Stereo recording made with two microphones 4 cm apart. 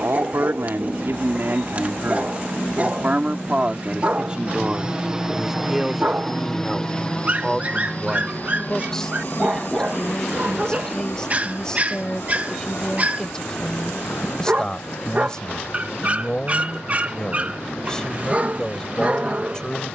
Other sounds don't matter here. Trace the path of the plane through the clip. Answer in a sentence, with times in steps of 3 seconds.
You can hear the plane on the right from 0 s and on the left from 6 s.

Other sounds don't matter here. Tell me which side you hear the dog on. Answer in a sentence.
In this clip you hear the dog on the right.